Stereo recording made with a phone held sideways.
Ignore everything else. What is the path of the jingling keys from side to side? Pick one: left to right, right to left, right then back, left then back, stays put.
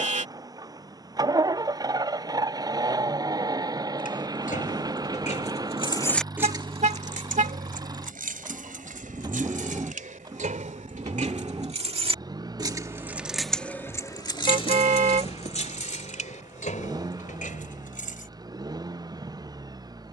right then back.